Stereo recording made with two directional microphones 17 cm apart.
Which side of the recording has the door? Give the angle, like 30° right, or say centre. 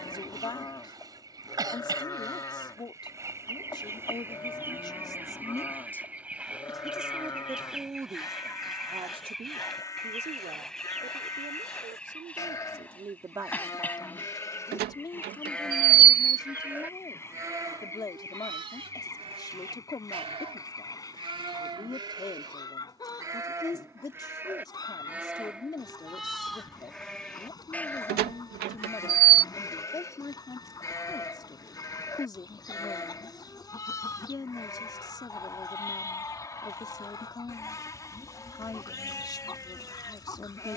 70° right.